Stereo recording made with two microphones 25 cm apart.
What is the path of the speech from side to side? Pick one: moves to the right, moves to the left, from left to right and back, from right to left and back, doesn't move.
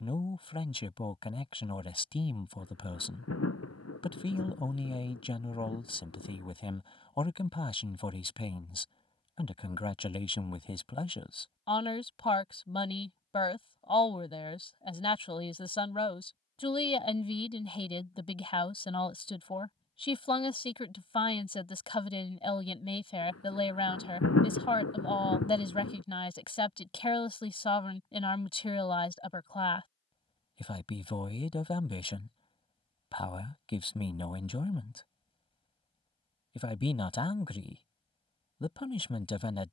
doesn't move.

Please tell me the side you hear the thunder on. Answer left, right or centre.
left.